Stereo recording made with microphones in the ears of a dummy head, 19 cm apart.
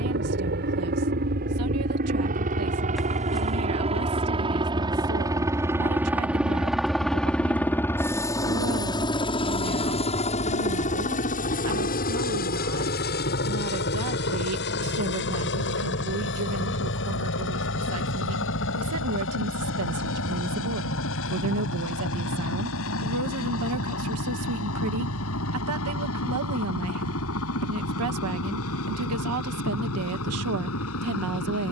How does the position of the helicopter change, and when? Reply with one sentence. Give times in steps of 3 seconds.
You can hear the helicopter on the right from 0 s, in the centre from 6 s and on the left from 9 s.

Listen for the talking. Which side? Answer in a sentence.
In this clip you hear the talking on the right.